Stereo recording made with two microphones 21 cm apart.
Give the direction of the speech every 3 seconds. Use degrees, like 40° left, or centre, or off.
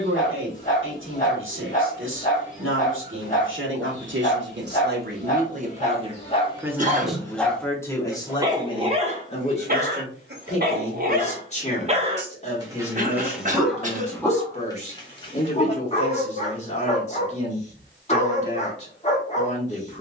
70° right, 60° right, 10° left, 30° left, 30° left, 30° left, 30° left.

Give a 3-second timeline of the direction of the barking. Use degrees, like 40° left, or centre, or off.
40° left, 40° left, 10° left, 40° right, centre, 30° left, 30° left.